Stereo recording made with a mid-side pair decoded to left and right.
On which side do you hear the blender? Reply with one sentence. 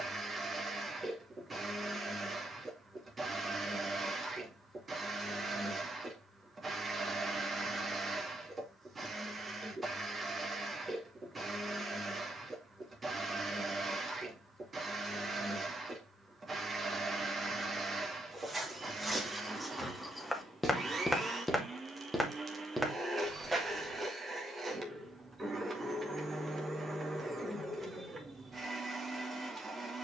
In this clip you hear the blender on the right.